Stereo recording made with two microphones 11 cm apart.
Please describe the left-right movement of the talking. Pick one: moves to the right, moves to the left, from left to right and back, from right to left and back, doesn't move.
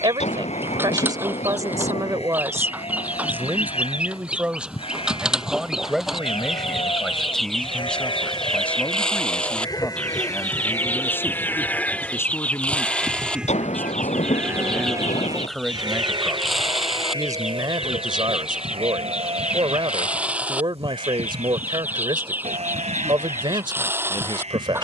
from right to left and back.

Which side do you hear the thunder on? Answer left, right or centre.
left.